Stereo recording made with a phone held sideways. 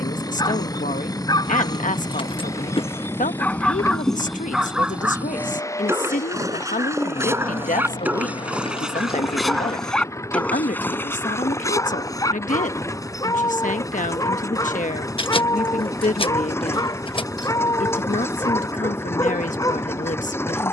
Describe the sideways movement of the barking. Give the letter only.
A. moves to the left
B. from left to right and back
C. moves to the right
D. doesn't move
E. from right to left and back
B.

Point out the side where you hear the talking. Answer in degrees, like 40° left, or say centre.
70° left.